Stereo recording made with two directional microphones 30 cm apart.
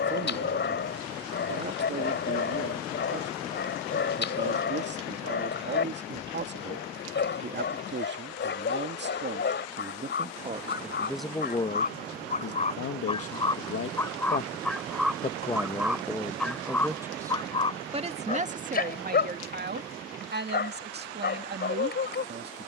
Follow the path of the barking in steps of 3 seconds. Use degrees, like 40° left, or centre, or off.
40° left, 40° left, 40° left, 40° left, 10° left, 10° left, 30° left, 30° left.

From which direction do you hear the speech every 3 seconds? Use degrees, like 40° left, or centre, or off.
40° right, 40° right, 40° right, 10° right, 50° left, centre, 30° right, 30° right.